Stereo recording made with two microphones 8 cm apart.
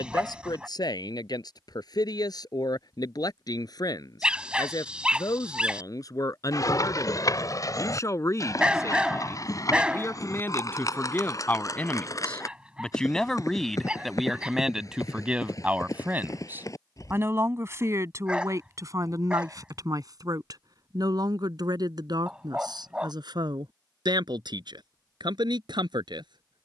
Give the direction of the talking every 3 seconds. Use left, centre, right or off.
left, left, left, left, centre, right, right, right, right.